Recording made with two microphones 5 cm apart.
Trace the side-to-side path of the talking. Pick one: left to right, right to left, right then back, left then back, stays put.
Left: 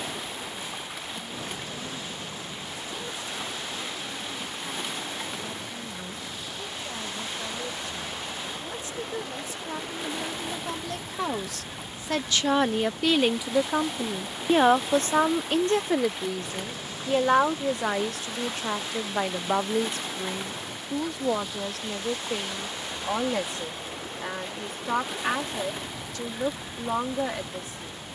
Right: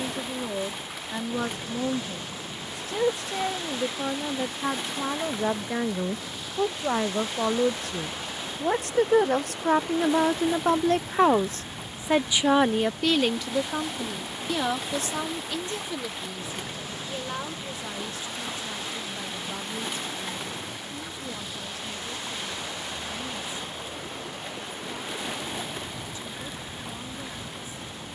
right to left.